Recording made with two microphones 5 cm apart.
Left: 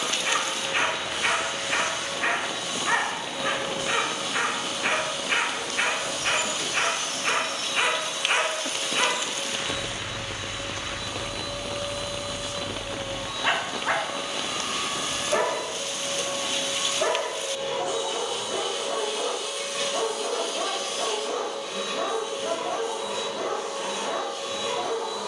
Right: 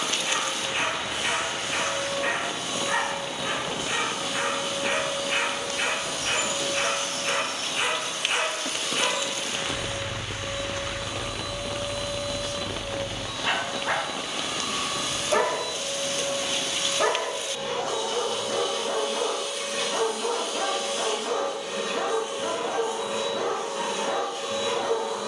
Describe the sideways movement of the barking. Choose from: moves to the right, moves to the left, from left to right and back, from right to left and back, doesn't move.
moves to the right.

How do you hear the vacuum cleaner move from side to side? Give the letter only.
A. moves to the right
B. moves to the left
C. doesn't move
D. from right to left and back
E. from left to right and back
D.